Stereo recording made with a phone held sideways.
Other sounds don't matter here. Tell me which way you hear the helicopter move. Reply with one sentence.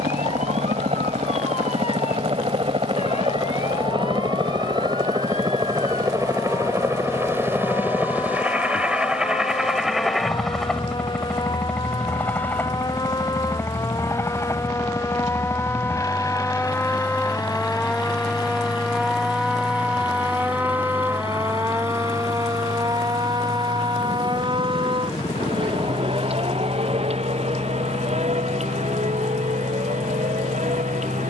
In this clip you hear the helicopter go from the right side to the left.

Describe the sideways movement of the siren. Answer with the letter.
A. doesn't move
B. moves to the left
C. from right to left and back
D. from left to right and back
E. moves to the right
E.